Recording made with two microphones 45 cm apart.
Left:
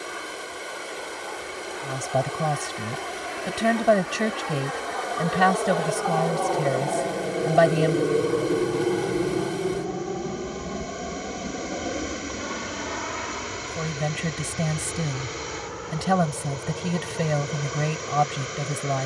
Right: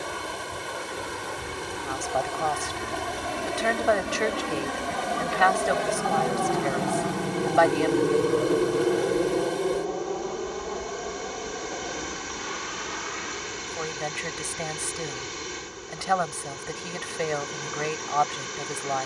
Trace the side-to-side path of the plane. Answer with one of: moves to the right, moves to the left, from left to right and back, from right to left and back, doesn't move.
moves to the left.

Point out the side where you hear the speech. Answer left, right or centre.
left.